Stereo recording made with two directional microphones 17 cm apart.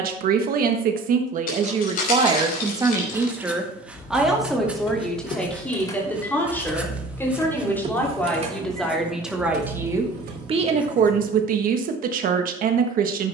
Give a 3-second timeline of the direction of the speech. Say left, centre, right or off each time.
right, centre, centre, right, right.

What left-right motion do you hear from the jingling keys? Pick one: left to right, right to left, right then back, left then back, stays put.
left to right.